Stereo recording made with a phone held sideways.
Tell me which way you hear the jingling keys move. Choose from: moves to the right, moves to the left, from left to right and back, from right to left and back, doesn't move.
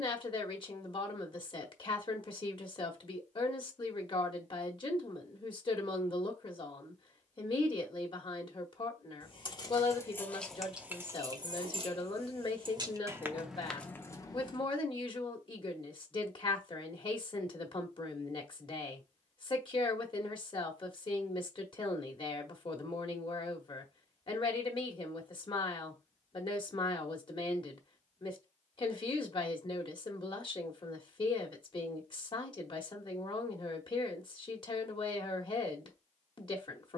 from left to right and back.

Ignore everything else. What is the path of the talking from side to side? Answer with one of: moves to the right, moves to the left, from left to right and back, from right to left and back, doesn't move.
doesn't move.